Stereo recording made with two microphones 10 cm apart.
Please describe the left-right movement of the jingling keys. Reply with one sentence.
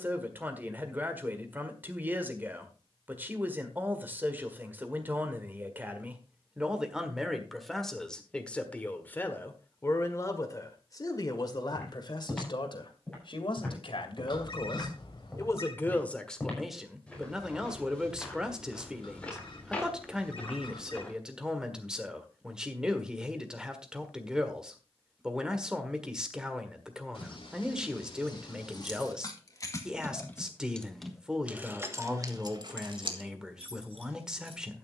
You can hear the jingling keys move to the right.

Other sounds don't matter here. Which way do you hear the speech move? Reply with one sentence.
In this clip you hear the speech go left and come back.